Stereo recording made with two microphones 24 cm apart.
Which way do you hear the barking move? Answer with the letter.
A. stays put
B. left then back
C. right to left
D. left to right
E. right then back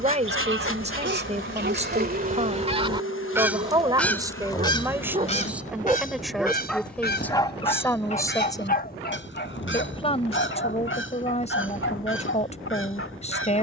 C.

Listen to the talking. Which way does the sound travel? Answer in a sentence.
You can hear the talking move to the left.